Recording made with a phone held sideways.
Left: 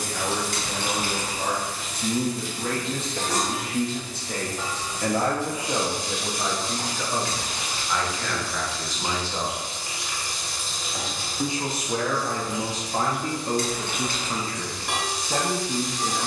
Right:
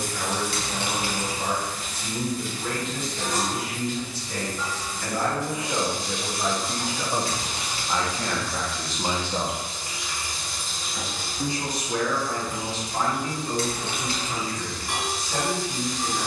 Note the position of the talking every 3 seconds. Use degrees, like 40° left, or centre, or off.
50° left, 40° left, 10° right, centre, 40° left, 50° left.